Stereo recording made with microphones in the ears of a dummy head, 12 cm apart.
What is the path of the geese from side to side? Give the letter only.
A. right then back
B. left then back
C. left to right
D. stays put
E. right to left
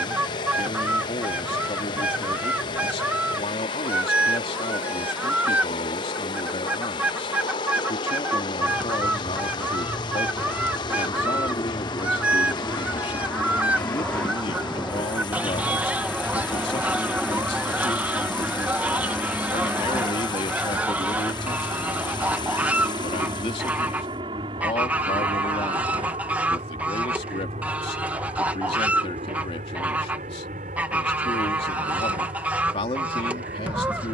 D.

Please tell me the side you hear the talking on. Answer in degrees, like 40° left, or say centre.
40° left.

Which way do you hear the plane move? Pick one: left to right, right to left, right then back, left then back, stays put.
left to right.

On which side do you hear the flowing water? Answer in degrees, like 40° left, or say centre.
30° left.